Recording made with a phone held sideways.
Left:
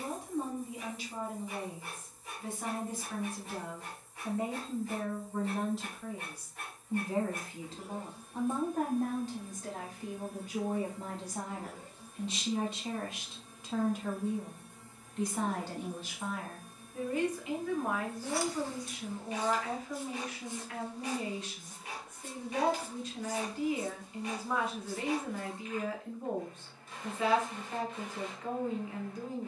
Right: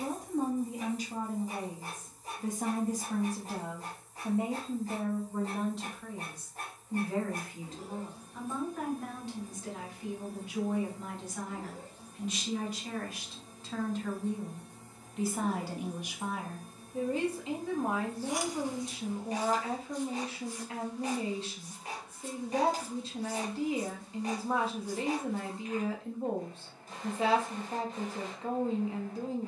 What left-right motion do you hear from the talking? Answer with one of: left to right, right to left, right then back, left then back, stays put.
left then back.